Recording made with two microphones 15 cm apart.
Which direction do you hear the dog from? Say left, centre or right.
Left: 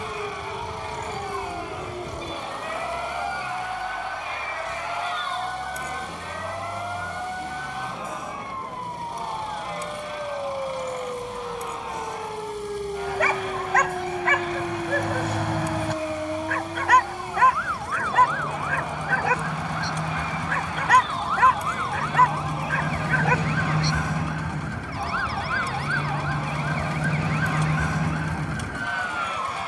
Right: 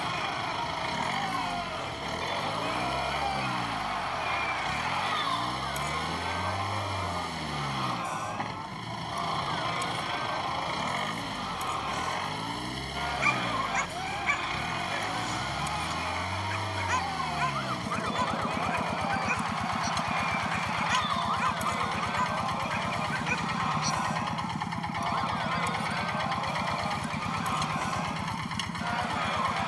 left.